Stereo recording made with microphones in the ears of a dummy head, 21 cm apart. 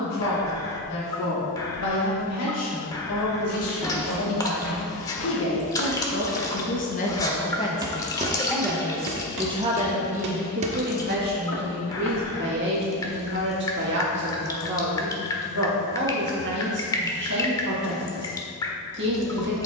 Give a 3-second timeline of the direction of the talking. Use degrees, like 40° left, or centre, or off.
70° left, 60° left, 20° left, 40° right, 50° right, 50° right, 50° right.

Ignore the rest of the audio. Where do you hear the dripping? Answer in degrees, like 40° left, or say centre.
20° left.